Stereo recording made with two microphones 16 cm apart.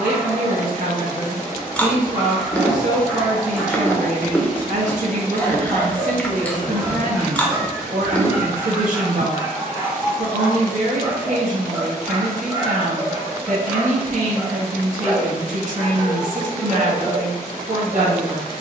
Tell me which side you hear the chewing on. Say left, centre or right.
centre.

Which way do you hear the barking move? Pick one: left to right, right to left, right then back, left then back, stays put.
stays put.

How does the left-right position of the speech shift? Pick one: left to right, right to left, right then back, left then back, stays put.
stays put.